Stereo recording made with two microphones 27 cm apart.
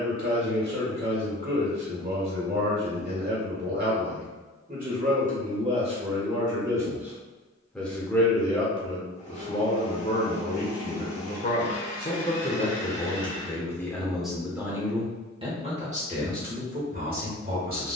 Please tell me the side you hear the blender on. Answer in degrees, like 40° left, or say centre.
20° left.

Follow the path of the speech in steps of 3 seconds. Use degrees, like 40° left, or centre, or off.
40° right, 30° right, centre, 40° left, 10° left, 30° right.